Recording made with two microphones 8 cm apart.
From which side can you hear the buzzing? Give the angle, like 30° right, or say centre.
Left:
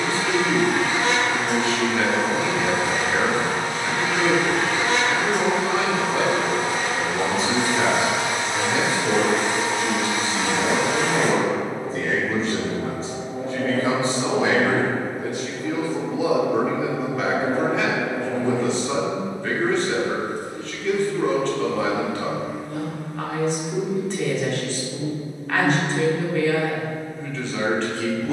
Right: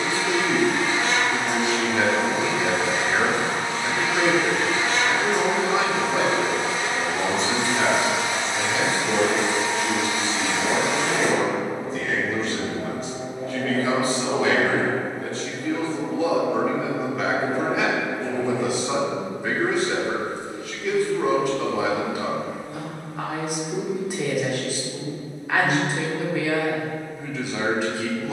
50° left.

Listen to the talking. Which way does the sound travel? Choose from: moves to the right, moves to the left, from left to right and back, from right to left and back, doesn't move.
from right to left and back.